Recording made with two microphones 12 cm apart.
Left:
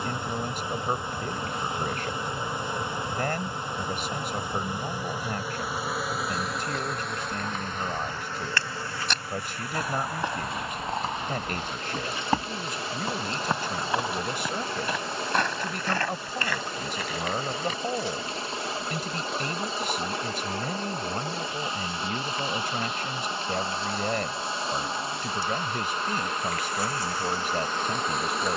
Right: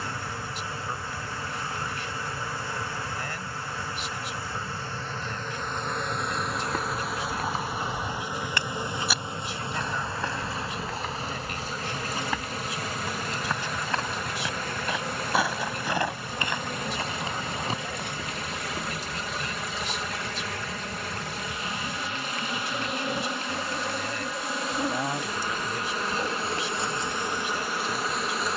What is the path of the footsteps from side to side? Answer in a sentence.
You can hear the footsteps move from right to left and back again.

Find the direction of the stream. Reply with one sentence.
You can hear the stream on the left.